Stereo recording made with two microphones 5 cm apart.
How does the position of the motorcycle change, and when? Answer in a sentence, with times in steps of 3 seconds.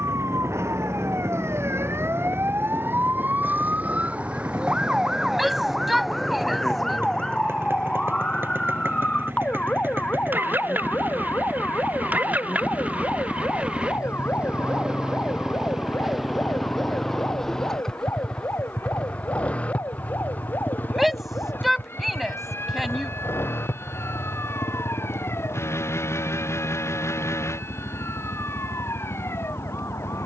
You can hear the motorcycle on the right from 0 s, in the centre from 15 s and on the left from 18 s.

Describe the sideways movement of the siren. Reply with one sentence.
You can hear the siren move from right to left.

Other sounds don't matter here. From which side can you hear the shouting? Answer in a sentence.
In this clip you hear the shouting in the centre.